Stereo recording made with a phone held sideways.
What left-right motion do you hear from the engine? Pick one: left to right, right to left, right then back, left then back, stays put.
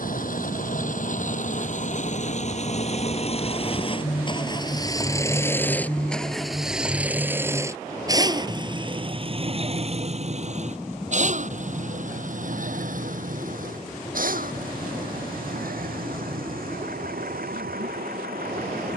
left to right.